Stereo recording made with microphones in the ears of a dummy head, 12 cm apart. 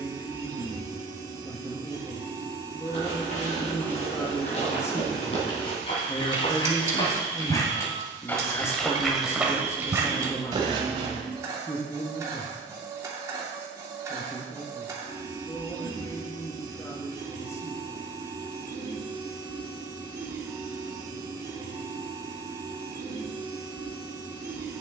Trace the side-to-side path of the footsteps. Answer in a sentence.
In this clip you hear the footsteps move to the right.